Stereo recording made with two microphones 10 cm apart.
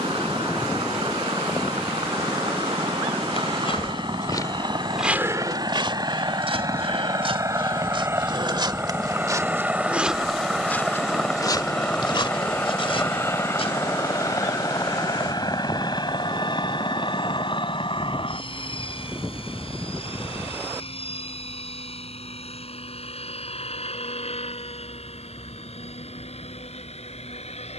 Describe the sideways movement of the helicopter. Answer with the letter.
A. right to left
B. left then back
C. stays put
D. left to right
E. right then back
A.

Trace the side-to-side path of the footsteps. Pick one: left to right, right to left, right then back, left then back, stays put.
right then back.